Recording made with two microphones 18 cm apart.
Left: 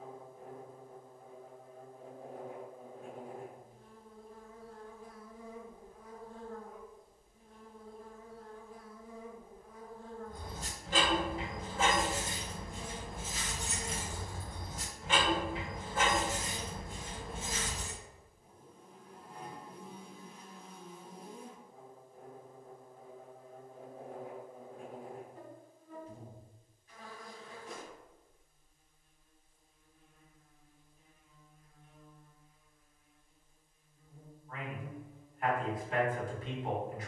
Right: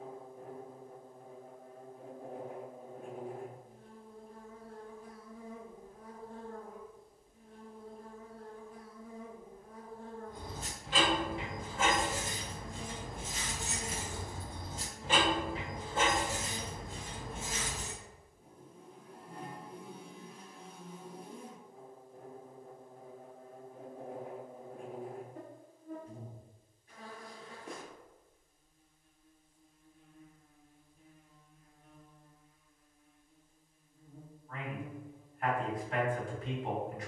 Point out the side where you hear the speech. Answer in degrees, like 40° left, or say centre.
centre.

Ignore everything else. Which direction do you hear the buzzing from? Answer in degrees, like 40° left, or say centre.
60° right.